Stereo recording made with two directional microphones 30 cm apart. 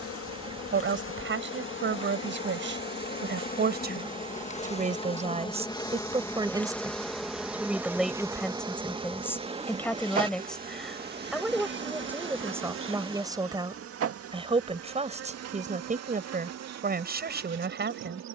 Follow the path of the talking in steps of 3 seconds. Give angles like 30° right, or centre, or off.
40° right, 30° right, 10° right, centre, 10° right, 30° right.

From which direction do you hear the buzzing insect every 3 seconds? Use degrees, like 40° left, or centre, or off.
40° left, 20° left, centre, 30° right, 50° right, 60° right.